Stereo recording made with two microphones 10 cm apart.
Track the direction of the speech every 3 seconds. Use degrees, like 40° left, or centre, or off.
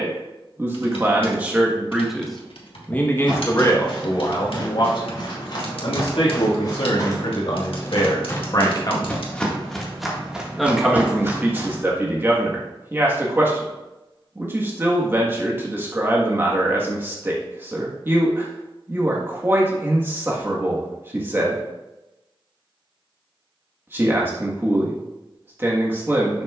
10° right, 40° left, 60° left, 10° right, 20° right, 20° right, 20° right, 20° right, 20° right.